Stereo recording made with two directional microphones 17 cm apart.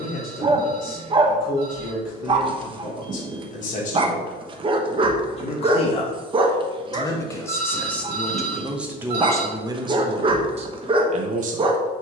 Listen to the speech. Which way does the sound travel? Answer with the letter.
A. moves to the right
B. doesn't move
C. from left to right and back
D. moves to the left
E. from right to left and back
A.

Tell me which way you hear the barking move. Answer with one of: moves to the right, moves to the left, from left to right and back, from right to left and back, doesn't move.
doesn't move.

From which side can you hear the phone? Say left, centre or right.
right.